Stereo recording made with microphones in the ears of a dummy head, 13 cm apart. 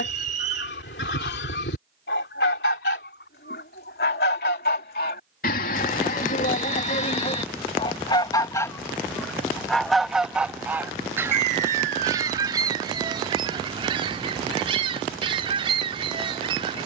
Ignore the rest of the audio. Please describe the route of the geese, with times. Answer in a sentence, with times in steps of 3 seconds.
In this clip you hear the geese on the left from 0 s, in the centre from 9 s and on the right from 12 s.